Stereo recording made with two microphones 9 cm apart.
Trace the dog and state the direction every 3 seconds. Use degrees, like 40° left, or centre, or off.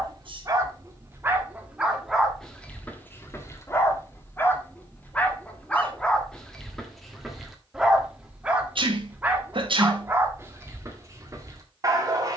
10° right, 20° left, centre, 20° right.